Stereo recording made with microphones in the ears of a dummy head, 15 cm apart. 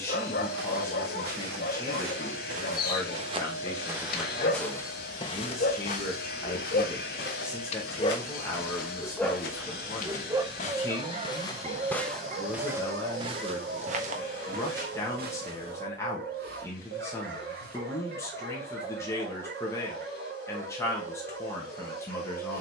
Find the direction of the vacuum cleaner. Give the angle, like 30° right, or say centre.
60° left.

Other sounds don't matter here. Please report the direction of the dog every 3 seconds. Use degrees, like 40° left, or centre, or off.
60° left, 60° left, 40° left, 20° right, 60° right, 60° right, 60° right, 60° right.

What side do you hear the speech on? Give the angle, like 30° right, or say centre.
20° left.